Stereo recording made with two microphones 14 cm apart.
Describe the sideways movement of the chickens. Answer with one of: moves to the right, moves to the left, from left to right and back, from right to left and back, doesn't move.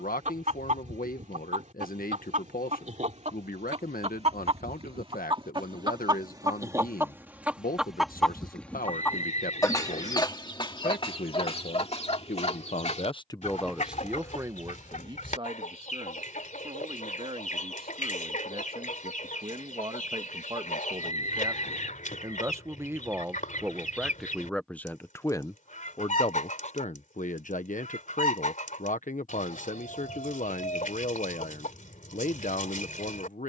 moves to the left.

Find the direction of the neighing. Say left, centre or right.
left.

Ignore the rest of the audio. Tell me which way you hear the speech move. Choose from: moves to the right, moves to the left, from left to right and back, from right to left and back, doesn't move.
from left to right and back.